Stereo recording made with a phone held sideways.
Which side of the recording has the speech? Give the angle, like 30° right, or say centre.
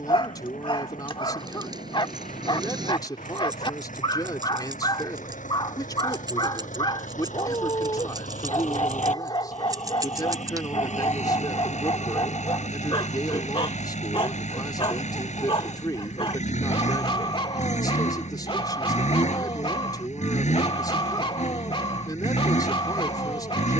30° left.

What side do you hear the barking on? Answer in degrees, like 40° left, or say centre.
40° left.